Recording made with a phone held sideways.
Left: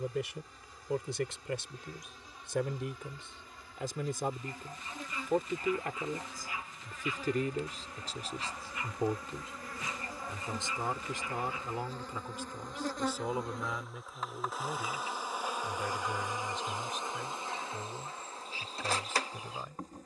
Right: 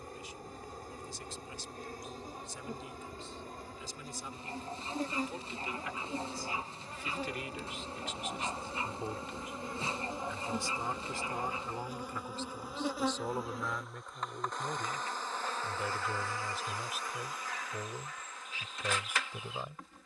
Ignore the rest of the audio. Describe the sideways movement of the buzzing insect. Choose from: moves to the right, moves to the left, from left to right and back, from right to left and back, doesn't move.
moves to the left.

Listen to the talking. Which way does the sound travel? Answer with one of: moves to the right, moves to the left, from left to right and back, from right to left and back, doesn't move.
moves to the right.